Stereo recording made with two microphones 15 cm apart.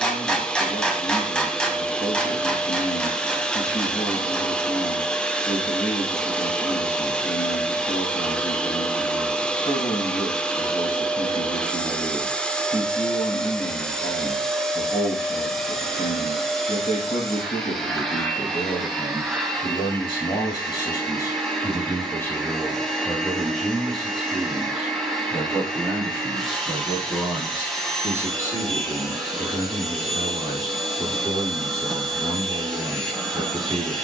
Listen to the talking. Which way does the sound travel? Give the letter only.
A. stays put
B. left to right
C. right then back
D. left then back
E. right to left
B.